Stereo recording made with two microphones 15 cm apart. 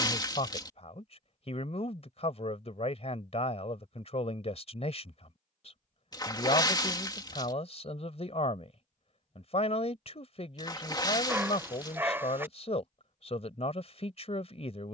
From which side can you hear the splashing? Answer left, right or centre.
left.